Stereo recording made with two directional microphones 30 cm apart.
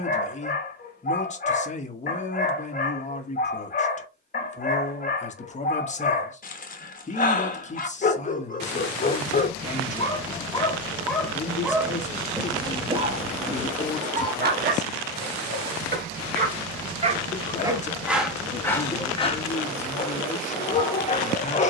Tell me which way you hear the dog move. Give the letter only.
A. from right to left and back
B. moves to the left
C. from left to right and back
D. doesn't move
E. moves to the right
C.